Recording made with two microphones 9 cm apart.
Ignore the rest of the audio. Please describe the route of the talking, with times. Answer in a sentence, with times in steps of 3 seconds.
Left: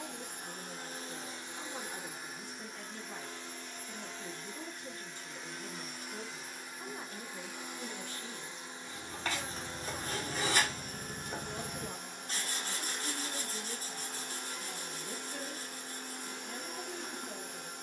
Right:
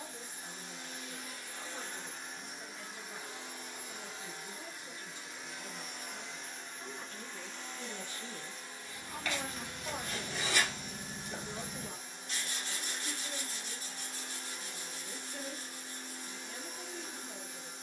In this clip you hear the talking on the left from 0 s, in the centre from 6 s, on the right from 9 s and on the left from 12 s.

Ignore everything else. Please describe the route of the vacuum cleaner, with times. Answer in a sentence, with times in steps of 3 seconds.
You can hear the vacuum cleaner on the left from 0 s, in the centre from 3 s and on the left from 9 s.